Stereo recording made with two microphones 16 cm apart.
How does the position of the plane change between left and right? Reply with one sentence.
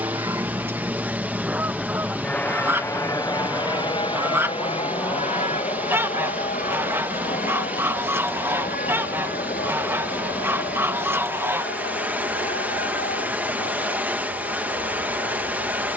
In this clip you hear the plane move to the left.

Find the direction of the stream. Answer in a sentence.
In this clip you hear the stream in the centre.